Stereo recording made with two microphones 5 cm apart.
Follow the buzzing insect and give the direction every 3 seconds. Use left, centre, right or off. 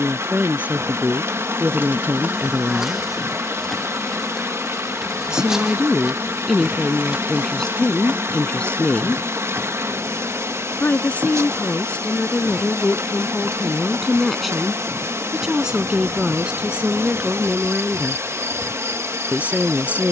right, centre, right, right, right, right, right.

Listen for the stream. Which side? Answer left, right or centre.
right.